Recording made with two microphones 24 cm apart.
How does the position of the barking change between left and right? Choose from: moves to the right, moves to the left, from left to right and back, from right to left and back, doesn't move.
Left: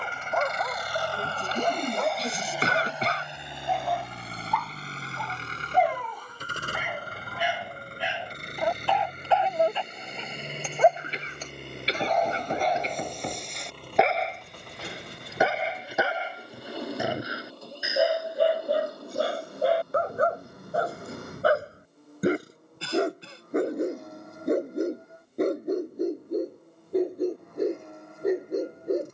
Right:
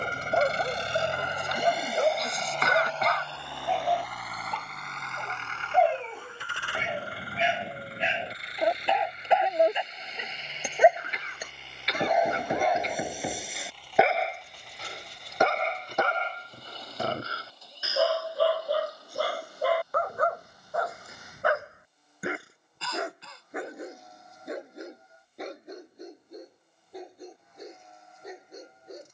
moves to the left.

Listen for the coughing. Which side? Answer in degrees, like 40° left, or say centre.
30° left.